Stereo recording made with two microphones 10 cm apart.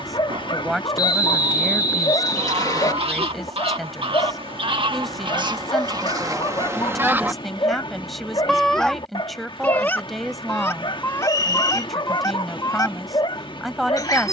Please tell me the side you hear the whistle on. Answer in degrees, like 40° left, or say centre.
40° left.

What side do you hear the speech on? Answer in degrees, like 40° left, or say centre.
centre.